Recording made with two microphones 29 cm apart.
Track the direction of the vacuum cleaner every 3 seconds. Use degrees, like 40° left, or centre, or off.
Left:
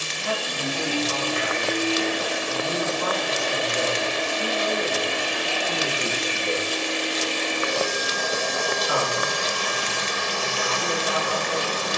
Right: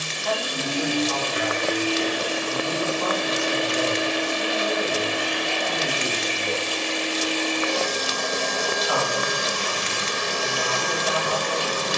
40° right, 10° right, 10° left, 40° right.